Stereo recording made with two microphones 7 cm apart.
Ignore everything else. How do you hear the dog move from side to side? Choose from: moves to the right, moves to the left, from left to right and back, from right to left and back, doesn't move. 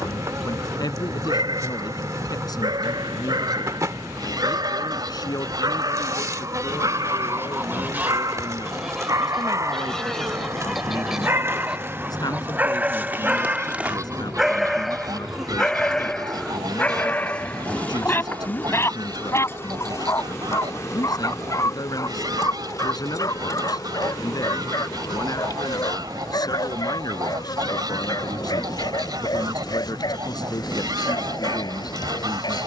moves to the left.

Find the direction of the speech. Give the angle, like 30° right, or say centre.
60° left.